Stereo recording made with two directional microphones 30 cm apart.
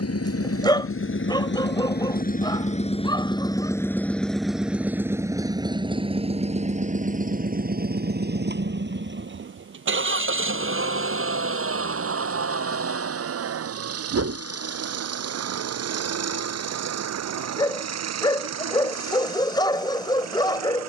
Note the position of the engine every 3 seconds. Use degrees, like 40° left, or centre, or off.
40° left, centre, 30° right, 40° right, 50° right, 50° right, 60° right.